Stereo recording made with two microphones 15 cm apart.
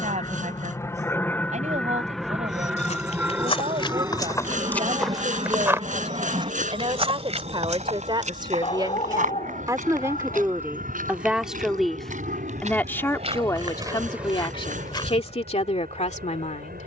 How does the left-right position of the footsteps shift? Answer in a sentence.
You can hear the footsteps go right and come back.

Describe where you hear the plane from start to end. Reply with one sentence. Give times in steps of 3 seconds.
In this clip you hear the plane in the centre from 0 s and on the right from 3 s.